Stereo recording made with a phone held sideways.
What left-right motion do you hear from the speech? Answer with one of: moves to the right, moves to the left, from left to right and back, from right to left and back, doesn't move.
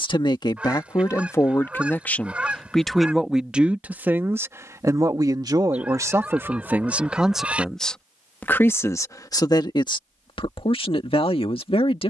from left to right and back.